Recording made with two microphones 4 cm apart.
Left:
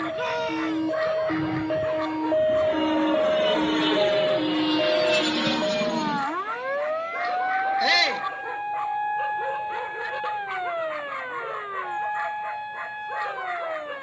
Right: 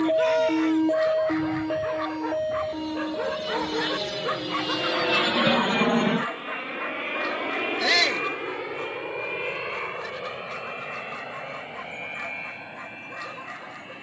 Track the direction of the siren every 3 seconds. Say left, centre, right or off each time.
centre, left, left, left, left.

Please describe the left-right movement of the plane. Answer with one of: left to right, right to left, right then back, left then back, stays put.
left to right.